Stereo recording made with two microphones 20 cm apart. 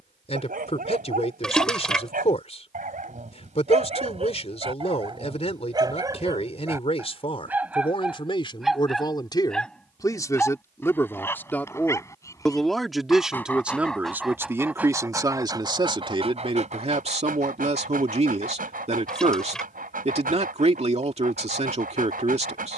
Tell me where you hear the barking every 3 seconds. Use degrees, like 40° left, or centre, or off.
50° right, 30° right, 10° right, 10° left, 10° left, 30° right, 50° right, 50° right.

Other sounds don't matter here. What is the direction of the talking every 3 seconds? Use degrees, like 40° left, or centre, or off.
30° left, 30° left, 30° left, 10° left, 10° right, 30° right, 30° right, 30° right.